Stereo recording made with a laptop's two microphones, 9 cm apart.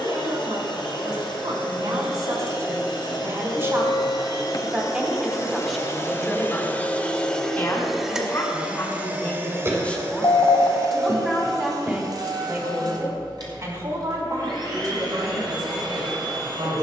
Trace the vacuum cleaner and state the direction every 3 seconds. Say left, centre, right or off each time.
left, left, centre, right, right, right.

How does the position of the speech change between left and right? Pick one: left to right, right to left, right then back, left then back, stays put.
left then back.